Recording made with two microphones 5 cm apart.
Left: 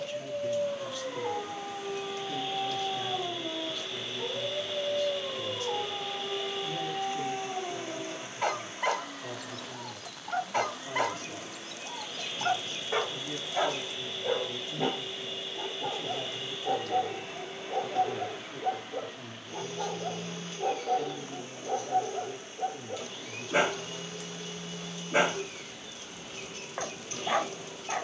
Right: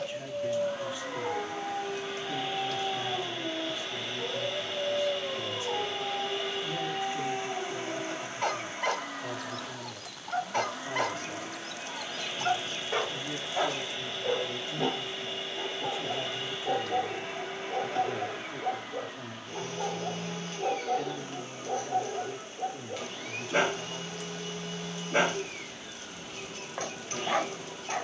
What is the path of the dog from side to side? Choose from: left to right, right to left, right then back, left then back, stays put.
stays put.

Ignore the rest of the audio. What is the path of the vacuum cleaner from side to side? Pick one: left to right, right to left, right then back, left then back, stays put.
stays put.